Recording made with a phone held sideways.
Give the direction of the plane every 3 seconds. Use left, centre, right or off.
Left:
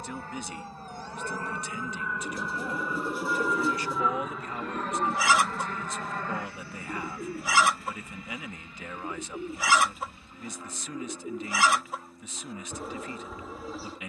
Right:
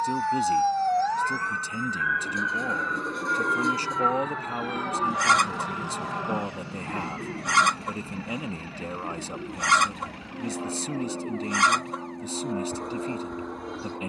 left, centre, right, right, right.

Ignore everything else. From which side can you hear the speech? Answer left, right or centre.
right.